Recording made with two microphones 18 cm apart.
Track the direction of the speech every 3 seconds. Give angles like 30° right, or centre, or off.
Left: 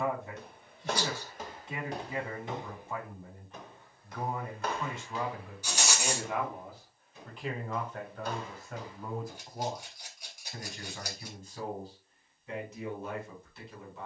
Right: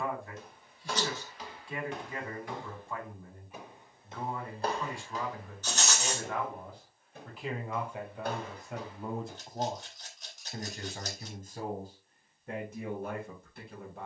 20° left, 20° left, 10° right, 40° right, 50° right.